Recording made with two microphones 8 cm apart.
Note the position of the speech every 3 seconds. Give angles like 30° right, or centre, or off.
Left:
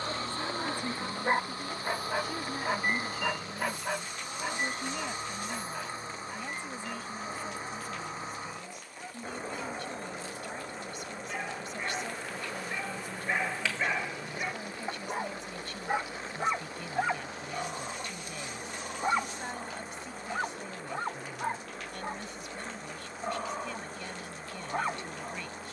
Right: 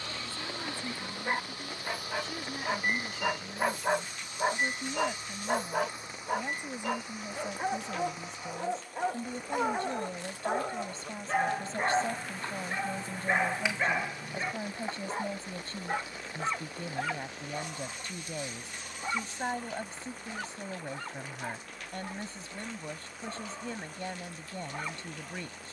10° left, centre, 20° right, 30° right, 30° right, 30° right, 30° right, 30° right, 30° right.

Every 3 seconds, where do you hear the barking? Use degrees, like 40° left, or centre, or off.
20° left, 40° right, 80° right, 60° right, 20° right, 20° left, 30° left, 40° left, 40° left.